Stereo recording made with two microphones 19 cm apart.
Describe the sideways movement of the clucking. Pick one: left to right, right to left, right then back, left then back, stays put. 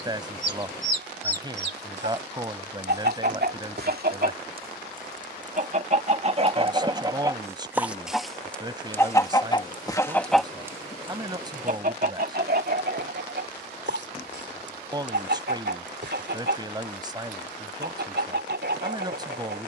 left then back.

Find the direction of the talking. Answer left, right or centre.
right.